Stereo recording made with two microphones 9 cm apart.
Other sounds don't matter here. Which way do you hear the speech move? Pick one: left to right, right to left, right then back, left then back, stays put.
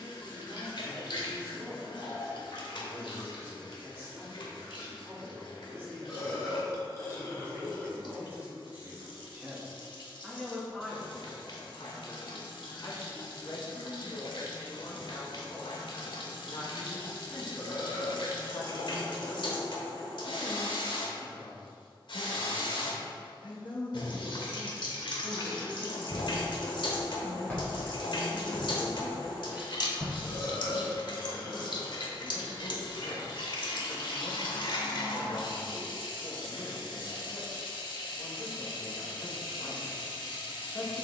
right to left.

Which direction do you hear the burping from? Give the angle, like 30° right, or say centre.
30° left.